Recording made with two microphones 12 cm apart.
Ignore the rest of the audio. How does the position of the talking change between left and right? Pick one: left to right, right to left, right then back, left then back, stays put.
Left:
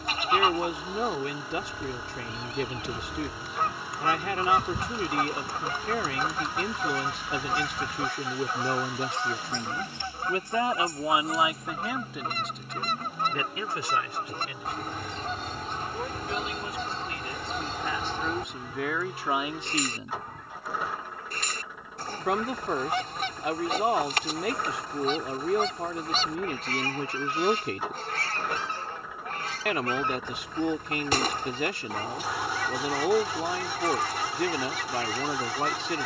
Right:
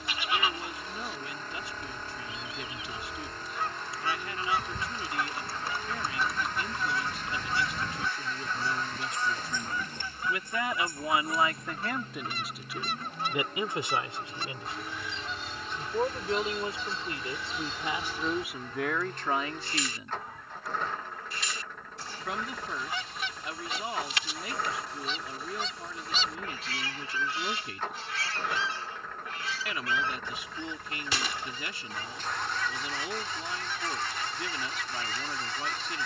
right then back.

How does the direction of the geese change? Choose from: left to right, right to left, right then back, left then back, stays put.
stays put.